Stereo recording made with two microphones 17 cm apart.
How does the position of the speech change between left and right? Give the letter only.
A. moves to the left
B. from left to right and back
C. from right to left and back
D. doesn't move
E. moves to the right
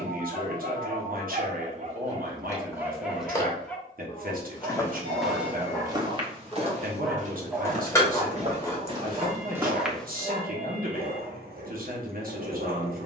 D.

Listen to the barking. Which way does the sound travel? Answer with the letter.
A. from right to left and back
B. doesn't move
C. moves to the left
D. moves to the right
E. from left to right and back
A.